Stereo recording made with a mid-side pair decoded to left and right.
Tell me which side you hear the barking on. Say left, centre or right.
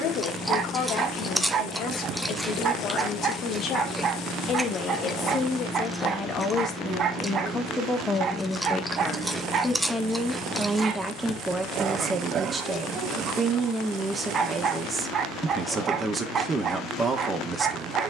right.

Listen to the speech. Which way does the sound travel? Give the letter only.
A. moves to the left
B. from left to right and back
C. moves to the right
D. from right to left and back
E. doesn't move
C.